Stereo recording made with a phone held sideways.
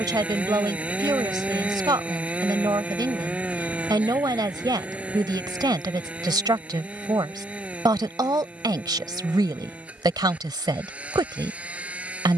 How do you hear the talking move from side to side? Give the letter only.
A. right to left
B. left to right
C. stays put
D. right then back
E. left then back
C.